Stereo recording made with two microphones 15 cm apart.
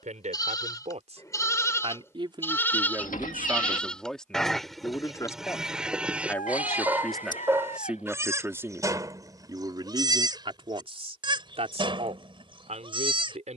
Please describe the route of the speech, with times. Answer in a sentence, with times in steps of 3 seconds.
You can hear the speech on the right from 0 s, in the centre from 3 s and on the right from 9 s.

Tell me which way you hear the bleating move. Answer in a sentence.
You can hear the bleating move to the right.